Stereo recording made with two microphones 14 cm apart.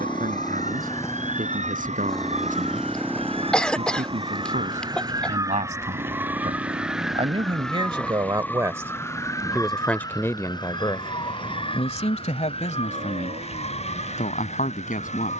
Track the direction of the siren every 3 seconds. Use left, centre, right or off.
right, right, centre, left, left.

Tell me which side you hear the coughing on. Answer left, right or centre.
centre.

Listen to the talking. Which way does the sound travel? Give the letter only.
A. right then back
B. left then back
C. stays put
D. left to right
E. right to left
E.